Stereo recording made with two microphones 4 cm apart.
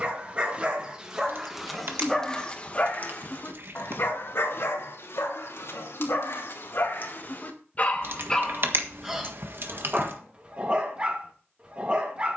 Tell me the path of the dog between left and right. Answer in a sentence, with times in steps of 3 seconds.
In this clip you hear the dog in the centre from 0 s, on the left from 3 s and on the right from 9 s.